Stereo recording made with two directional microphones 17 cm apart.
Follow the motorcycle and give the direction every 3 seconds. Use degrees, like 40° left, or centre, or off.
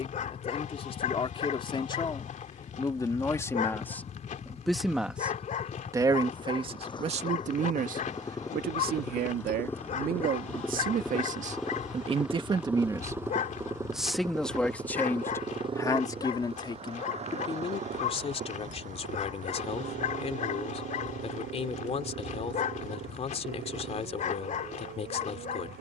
50° left, 40° left, 20° left, 10° left, 10° right, 30° right, 50° right, 60° right, 70° right.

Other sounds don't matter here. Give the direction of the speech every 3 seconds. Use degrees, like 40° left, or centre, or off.
30° left, centre, 40° right, 60° right, 10° right, 20° left, 40° left, 40° left, 40° left.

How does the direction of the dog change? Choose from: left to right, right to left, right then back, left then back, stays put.
stays put.